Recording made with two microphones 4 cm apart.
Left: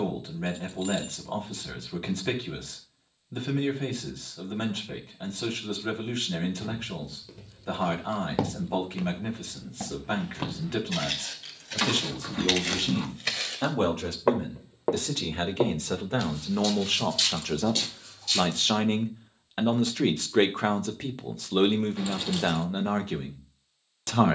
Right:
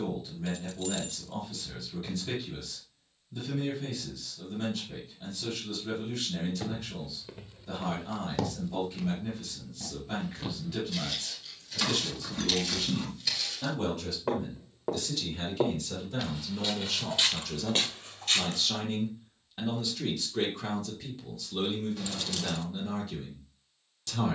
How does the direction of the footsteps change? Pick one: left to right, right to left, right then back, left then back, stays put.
left then back.